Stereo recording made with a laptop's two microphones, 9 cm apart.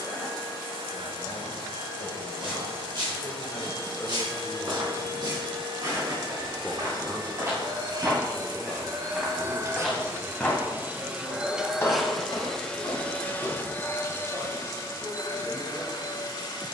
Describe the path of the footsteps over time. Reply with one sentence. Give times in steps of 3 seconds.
In this clip you hear the footsteps on the right from 0 s, in the centre from 9 s, on the left from 12 s and not at all from 15 s.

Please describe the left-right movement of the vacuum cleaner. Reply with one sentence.
You can hear the vacuum cleaner go from the right side to the left.